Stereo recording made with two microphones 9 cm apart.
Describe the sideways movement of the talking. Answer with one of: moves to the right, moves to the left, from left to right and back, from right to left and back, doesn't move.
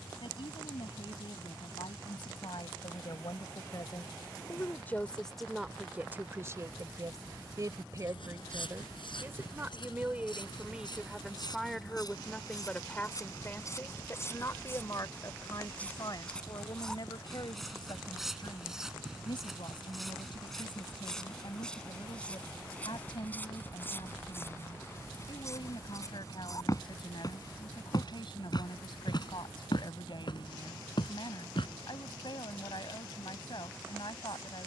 from left to right and back.